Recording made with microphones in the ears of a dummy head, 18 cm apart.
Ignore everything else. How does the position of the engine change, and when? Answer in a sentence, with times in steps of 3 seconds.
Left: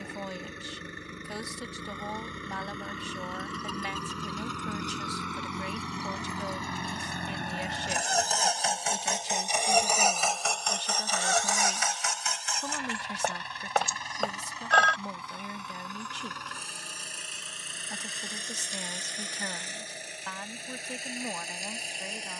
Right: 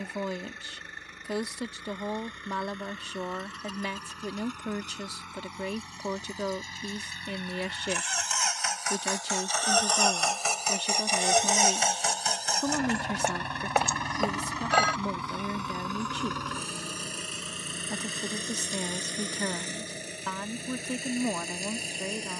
In this clip you hear the engine on the left from 0 s, in the centre from 9 s and on the right from 12 s.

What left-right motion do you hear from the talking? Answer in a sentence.
In this clip you hear the talking stay in one place.